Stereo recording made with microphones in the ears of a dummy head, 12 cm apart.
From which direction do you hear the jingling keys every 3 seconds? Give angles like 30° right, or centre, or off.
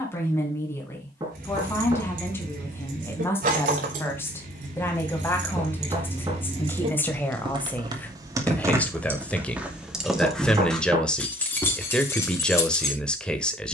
80° right, 60° right, 40° right, centre, 20° left.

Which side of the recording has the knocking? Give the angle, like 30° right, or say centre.
30° right.